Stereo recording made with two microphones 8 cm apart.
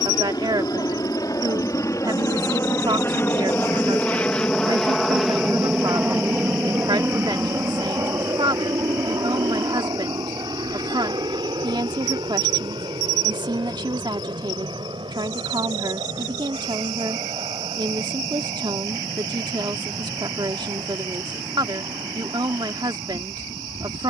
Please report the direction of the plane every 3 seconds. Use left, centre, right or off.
left, centre, right, right, right, right, right, right.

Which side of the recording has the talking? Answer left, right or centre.
right.